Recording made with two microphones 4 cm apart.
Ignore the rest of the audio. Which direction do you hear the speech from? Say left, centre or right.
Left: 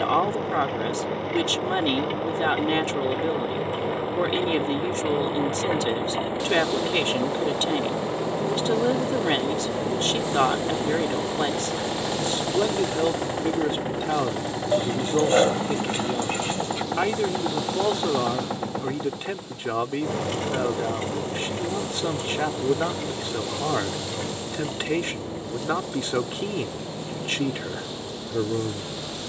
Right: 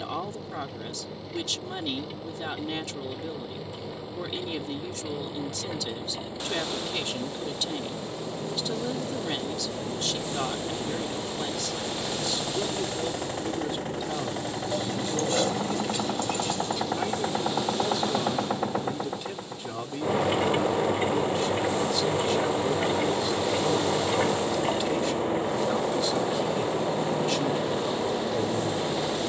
left.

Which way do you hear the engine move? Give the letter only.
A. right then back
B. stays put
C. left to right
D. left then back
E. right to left
C.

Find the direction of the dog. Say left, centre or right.
left.